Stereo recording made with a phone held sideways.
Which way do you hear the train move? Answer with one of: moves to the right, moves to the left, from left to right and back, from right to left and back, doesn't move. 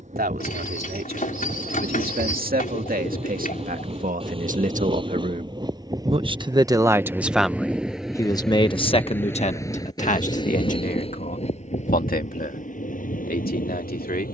moves to the left.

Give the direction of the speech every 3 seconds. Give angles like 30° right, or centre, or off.
70° right, 60° right, centre, 50° left, 70° left.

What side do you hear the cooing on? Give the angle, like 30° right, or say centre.
60° left.